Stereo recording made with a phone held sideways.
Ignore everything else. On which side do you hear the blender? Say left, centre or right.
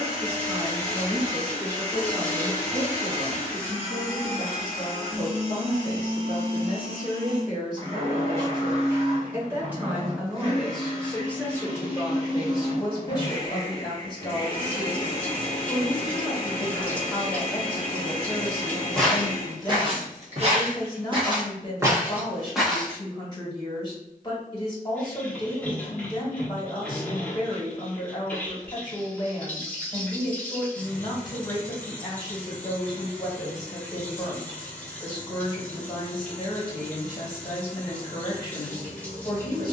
right.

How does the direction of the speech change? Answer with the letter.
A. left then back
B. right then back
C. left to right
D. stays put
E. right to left
E.